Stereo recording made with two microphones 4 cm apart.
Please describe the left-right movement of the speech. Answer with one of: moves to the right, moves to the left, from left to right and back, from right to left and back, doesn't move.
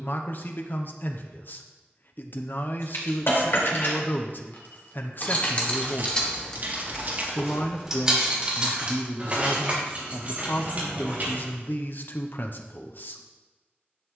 doesn't move.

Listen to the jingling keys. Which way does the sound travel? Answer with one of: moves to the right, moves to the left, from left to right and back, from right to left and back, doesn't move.
moves to the right.